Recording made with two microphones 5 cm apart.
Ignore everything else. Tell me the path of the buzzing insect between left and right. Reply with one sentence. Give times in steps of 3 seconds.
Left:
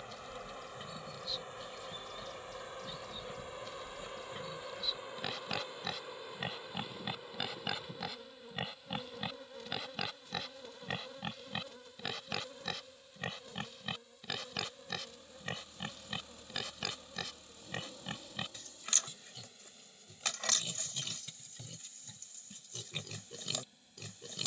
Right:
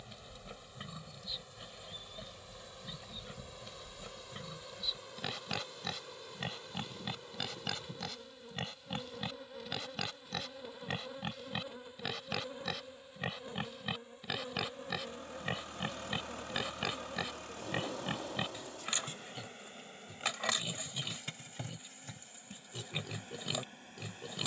You can hear the buzzing insect on the left from 0 s, in the centre from 6 s and on the right from 12 s.